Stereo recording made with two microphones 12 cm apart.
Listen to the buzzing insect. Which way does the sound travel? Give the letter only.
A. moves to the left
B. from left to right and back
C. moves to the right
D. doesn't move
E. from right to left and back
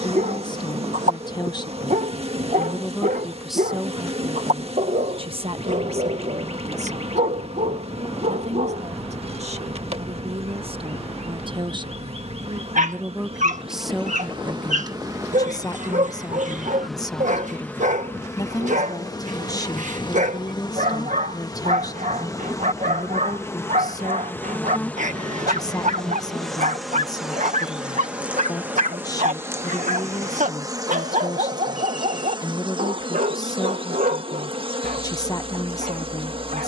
E.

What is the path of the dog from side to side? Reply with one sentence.
You can hear the dog stay in one place.